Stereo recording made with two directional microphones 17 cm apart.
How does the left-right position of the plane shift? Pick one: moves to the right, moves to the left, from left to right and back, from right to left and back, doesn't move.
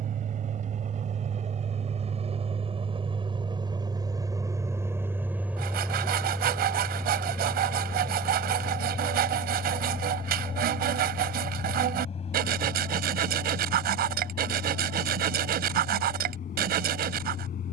moves to the left.